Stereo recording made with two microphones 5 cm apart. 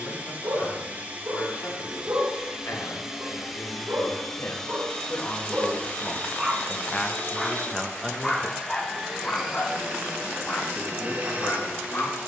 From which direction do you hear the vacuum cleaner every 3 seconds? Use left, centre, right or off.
right, centre, left, right.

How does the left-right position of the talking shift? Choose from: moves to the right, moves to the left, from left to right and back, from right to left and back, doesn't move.
moves to the right.